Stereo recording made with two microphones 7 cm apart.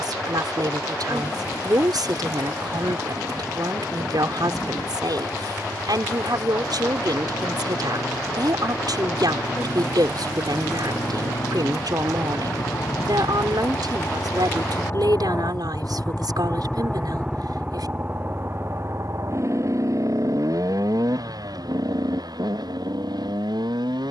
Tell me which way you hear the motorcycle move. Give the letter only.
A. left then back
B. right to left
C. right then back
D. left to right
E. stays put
D.